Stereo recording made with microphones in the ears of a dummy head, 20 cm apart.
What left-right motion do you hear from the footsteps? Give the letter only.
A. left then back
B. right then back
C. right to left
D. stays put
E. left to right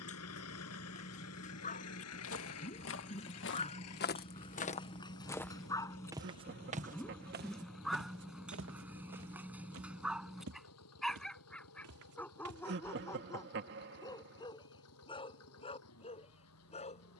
E.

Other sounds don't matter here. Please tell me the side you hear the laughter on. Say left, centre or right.
right.